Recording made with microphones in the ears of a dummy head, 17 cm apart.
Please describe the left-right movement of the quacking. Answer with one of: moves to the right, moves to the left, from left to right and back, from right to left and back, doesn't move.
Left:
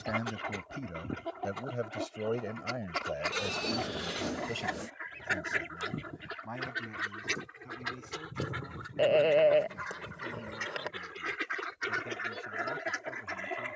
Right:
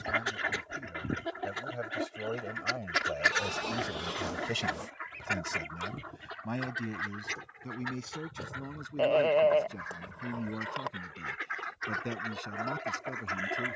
from right to left and back.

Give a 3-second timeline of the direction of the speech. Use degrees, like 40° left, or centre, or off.
40° left, 20° right, 50° right, 60° right, 60° right.